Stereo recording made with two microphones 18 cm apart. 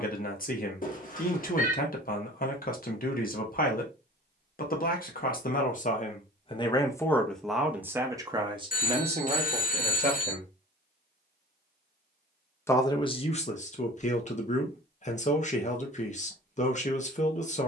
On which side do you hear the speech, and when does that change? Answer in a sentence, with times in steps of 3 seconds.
You can hear the speech on the left from 0 s, in the centre from 6 s, on the right from 9 s and on the left from 12 s.